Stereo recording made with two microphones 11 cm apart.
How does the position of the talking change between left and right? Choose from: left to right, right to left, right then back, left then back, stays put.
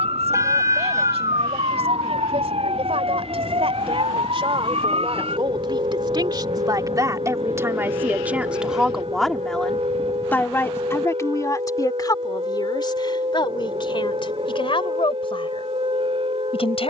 right to left.